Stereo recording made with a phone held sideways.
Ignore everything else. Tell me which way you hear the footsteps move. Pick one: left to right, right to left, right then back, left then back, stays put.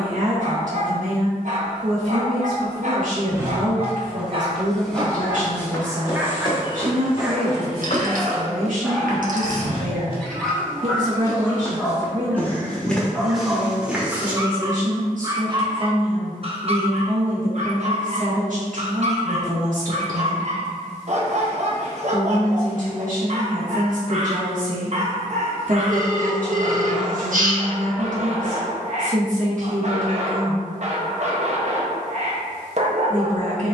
left then back.